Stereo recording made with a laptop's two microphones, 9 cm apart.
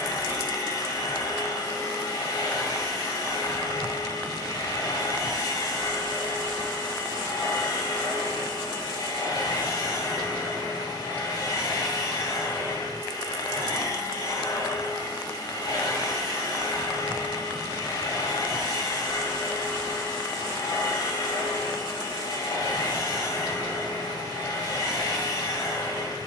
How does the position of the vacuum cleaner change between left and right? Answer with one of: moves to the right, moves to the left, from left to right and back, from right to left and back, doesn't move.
doesn't move.